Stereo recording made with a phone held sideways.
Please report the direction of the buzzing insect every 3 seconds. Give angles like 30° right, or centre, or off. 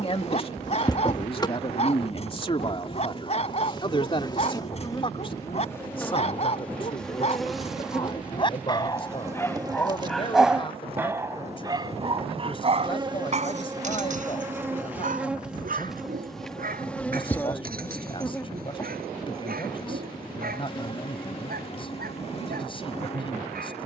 40° left, 20° left, centre, 30° right, 20° right, centre, 30° left, 40° left.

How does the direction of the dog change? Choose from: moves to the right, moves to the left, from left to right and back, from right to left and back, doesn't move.
moves to the right.